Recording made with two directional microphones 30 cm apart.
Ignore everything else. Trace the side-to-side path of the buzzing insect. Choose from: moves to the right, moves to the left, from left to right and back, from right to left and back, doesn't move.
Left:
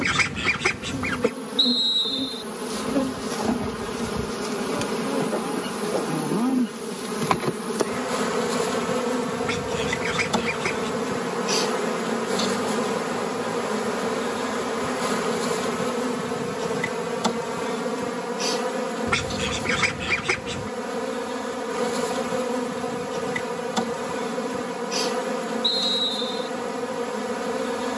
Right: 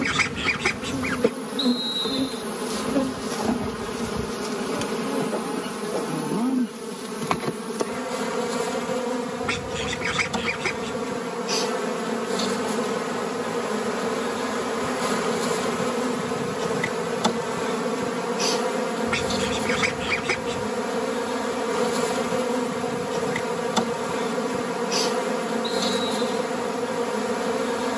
from right to left and back.